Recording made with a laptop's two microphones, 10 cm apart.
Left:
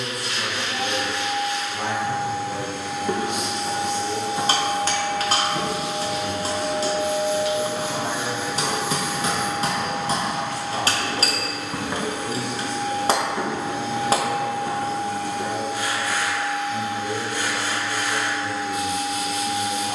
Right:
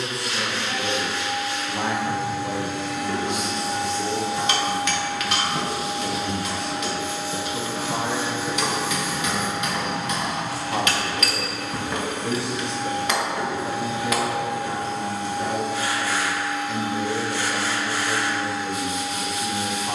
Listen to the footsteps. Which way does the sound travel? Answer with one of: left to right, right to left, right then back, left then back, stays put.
right then back.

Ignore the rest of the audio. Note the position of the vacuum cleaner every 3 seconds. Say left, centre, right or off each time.
left, left, left, left, centre, right, centre.